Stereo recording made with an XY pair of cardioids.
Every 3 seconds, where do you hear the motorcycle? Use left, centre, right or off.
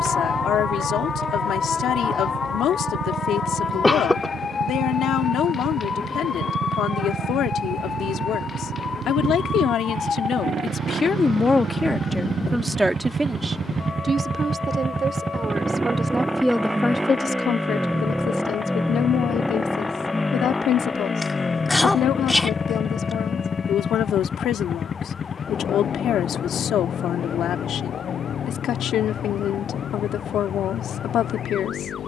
right, right, right, right, right, centre, centre, left, left, left, left.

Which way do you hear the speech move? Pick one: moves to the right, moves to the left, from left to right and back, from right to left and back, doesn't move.
from left to right and back.